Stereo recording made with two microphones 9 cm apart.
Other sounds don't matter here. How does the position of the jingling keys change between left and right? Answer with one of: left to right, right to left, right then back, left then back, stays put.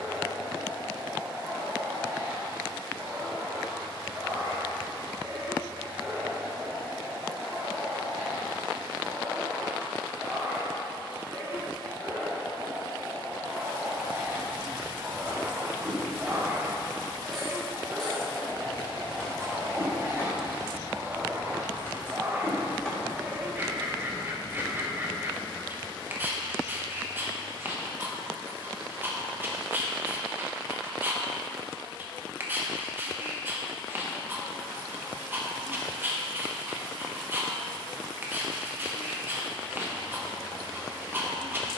left then back.